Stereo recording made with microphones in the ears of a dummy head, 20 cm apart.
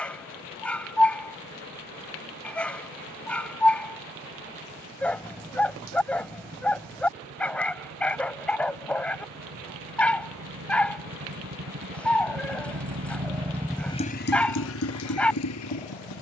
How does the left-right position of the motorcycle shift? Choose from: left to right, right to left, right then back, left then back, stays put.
right to left.